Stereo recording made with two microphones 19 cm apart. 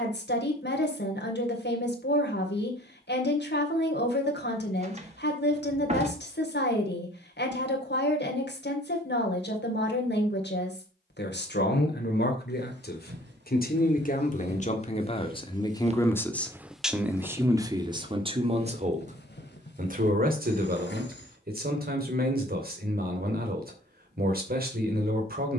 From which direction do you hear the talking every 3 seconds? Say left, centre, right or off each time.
left, left, left, left, left, centre, right, right, right.